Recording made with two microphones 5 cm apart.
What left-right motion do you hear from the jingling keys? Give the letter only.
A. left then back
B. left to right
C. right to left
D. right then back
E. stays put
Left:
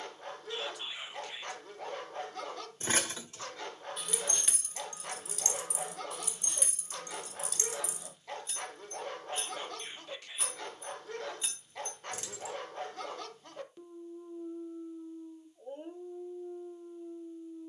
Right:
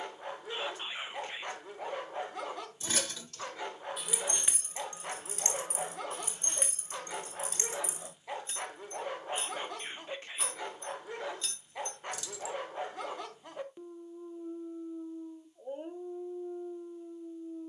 D.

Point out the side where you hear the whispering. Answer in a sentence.
You can hear the whispering on the right.